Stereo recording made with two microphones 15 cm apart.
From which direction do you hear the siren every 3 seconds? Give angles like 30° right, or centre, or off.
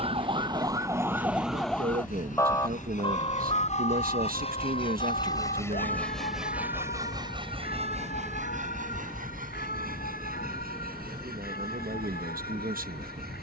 10° right, 50° left, 70° left, 70° left, 80° left.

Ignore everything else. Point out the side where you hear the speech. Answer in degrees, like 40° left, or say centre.
70° right.